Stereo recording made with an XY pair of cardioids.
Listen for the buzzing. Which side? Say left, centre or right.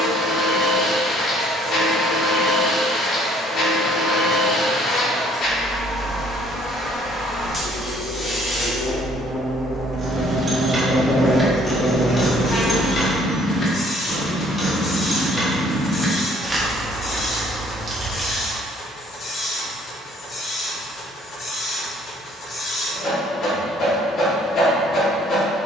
left.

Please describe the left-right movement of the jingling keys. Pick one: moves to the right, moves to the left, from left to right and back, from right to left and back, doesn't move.
from right to left and back.